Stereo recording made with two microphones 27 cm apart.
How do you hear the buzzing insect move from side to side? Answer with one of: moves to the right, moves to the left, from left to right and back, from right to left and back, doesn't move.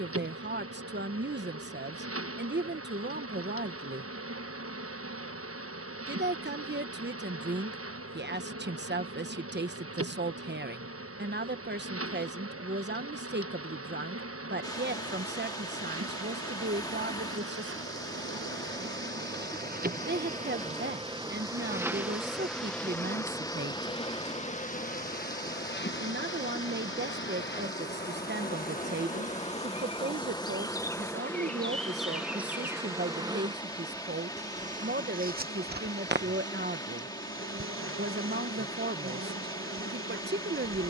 from right to left and back.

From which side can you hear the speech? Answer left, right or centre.
right.